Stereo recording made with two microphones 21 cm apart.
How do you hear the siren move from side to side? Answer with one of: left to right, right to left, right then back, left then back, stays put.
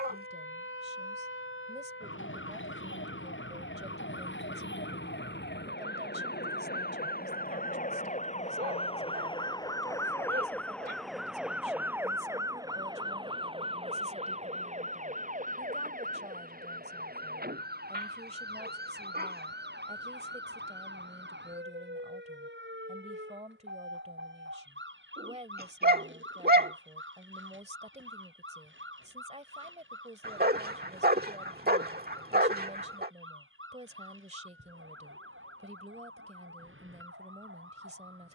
left to right.